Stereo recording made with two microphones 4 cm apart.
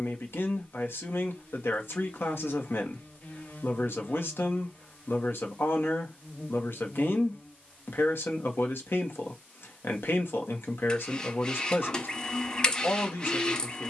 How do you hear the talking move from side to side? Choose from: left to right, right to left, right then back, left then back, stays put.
stays put.